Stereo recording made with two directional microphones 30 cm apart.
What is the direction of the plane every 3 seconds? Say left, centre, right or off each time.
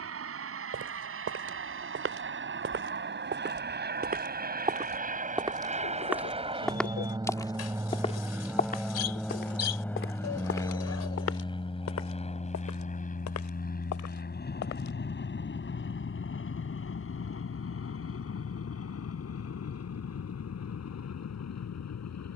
right, right, centre, centre, left, left, left, left.